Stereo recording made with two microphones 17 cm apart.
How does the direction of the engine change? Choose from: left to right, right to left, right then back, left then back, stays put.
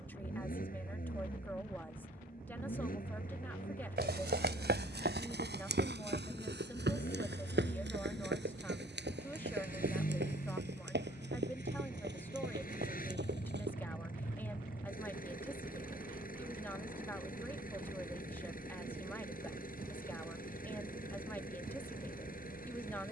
stays put.